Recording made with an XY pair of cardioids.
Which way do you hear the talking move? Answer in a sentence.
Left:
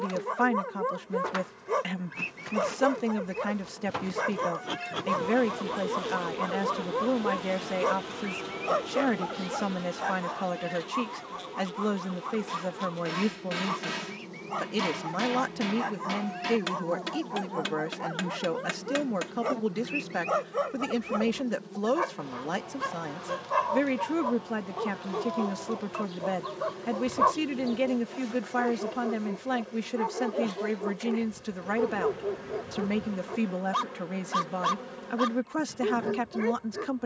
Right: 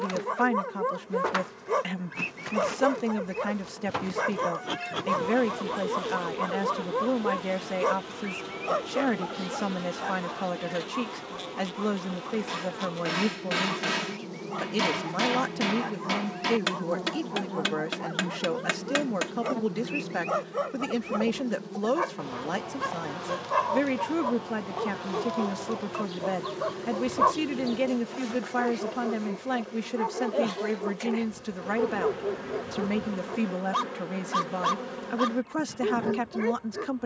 In this clip you hear the talking stay in one place.